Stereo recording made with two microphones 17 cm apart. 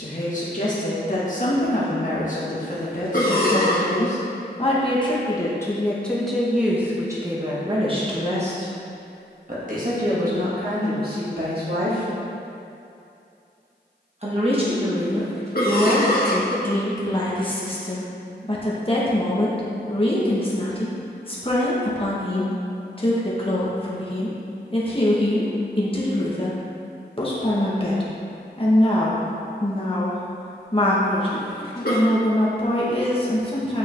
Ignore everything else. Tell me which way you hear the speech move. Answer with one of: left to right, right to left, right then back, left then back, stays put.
right then back.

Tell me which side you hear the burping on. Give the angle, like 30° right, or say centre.
50° left.